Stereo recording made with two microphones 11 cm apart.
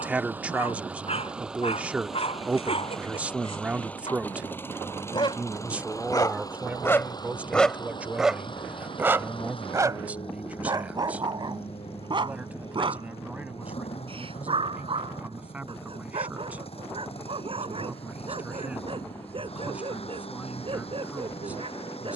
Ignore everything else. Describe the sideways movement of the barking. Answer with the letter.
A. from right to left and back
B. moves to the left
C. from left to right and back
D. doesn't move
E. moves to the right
E.